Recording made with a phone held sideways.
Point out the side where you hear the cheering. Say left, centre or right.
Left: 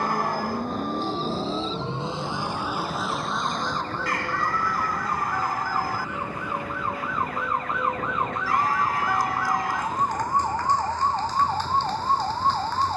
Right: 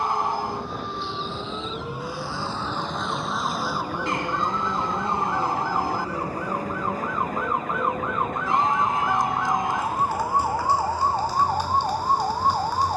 right.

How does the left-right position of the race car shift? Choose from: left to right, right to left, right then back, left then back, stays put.
left to right.